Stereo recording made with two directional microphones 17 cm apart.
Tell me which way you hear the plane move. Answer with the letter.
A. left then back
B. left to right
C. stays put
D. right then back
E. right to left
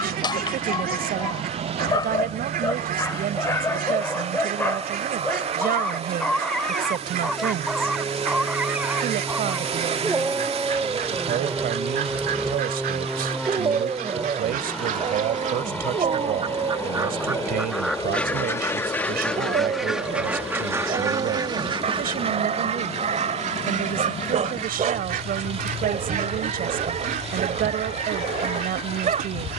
E.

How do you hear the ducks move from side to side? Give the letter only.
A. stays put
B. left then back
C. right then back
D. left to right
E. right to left
B.